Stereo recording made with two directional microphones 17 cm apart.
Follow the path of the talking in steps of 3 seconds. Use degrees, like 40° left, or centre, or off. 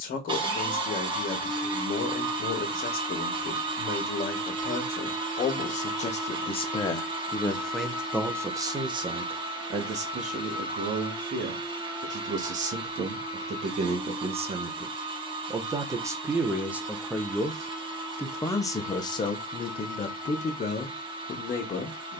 60° left, 60° left, 10° left, 50° right, 40° right, 10° right, 30° left, 50° left.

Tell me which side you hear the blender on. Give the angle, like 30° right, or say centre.
30° right.